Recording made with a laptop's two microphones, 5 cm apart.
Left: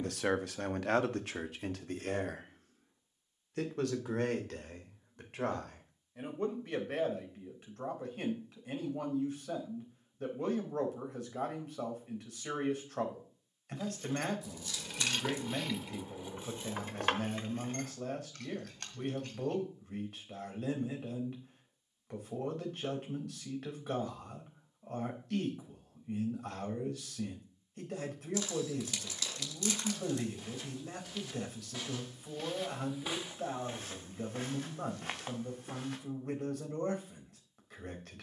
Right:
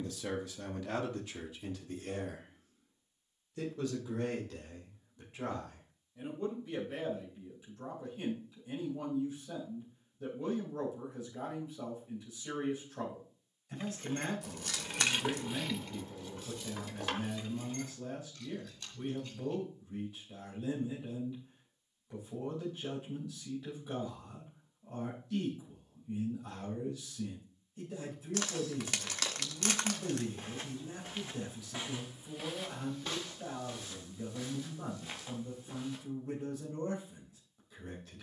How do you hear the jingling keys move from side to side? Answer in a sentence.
In this clip you hear the jingling keys travel towards the left.